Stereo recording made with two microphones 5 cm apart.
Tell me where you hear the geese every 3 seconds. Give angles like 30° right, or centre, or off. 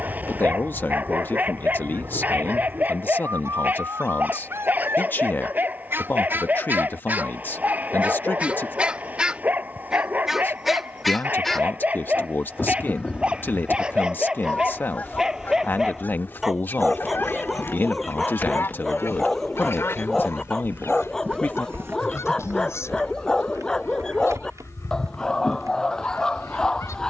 60° right, 50° right, 30° right, centre, 20° left, 40° left, 50° left, 60° left, 60° left.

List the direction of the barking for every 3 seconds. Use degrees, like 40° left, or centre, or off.
30° right, 30° right, 30° right, 30° right, 20° right, centre, 10° left, 10° left, 10° left.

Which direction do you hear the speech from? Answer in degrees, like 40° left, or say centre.
40° left.